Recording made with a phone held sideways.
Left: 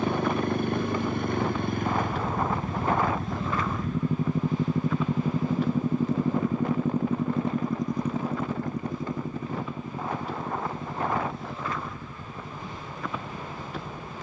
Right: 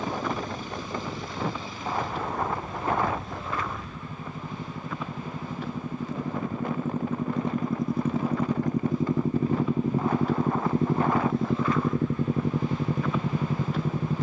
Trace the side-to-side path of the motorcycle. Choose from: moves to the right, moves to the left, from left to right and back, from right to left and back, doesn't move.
moves to the right.